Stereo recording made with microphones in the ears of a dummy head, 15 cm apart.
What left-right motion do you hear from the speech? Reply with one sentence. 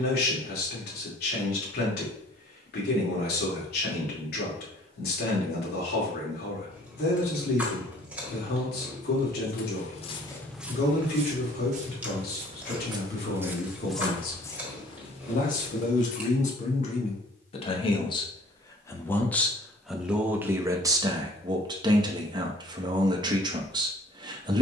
In this clip you hear the speech go from the left side to the right.